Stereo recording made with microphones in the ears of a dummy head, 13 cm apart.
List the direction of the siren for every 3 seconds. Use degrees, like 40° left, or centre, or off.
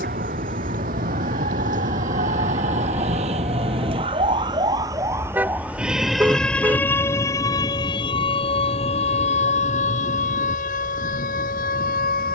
60° right, 30° right, 20° left, 50° left.